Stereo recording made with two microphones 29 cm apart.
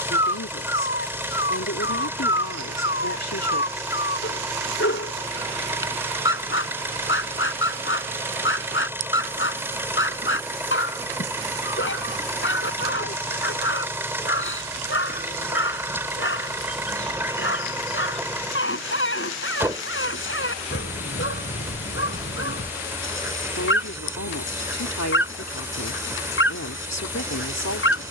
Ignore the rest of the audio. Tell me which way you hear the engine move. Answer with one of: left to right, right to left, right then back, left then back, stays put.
stays put.